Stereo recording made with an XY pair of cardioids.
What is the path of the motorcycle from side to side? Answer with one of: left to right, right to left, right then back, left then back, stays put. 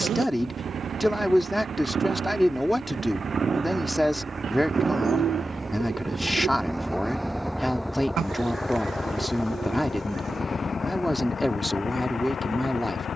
right to left.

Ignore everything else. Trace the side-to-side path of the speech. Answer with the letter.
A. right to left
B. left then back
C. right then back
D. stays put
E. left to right
D.